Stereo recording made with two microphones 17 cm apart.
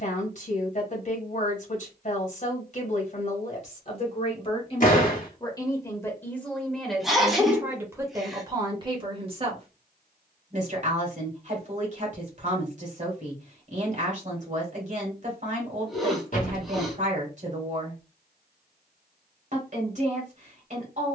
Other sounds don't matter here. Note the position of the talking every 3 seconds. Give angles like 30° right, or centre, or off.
50° left, 30° left, 10° right, 40° right, 50° right, 50° right, 50° right.